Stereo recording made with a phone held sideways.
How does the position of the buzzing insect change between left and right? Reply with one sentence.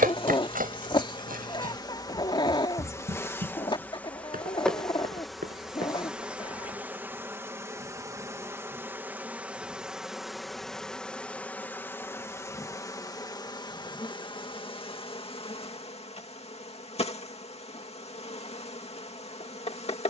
In this clip you hear the buzzing insect go right and come back.